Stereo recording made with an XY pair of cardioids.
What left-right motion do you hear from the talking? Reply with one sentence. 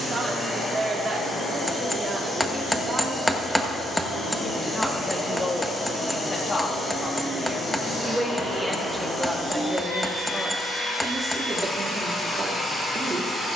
In this clip you hear the talking go left and come back.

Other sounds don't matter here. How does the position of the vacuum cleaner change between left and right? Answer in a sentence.
You can hear the vacuum cleaner stay in one place.